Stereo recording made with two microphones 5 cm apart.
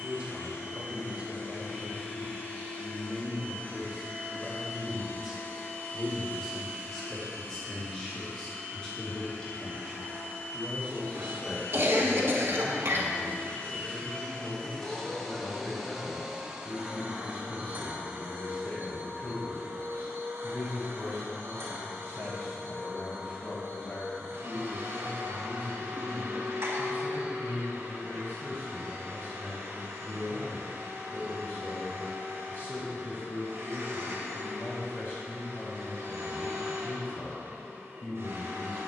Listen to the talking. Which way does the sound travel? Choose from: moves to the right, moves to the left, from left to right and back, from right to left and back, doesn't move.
moves to the left.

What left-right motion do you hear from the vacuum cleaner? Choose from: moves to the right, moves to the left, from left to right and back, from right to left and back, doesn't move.
moves to the right.